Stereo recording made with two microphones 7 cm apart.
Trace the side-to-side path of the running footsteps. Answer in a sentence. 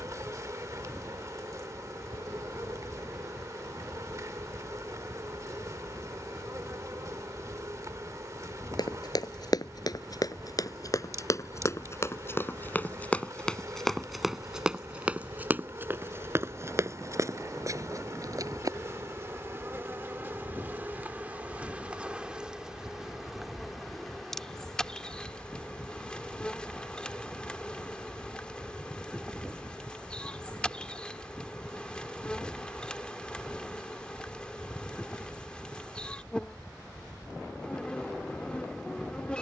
You can hear the running footsteps go from the left side to the right.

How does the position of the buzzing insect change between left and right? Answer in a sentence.
In this clip you hear the buzzing insect move from right to left.